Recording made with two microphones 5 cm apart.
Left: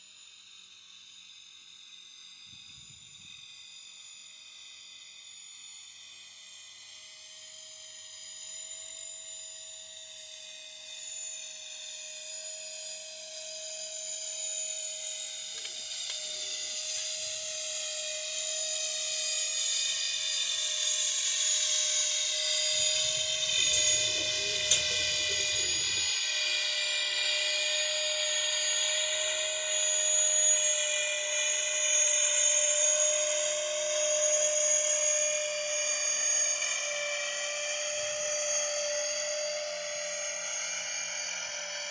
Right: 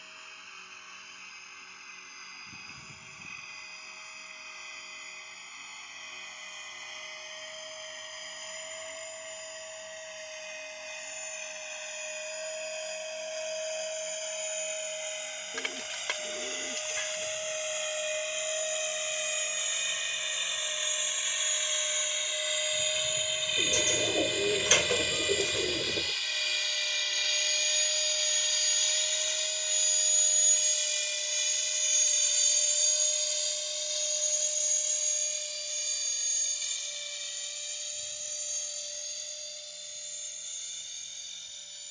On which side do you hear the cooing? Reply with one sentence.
In this clip you hear the cooing on the right.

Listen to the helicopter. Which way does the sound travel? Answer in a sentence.
You can hear the helicopter move from right to left.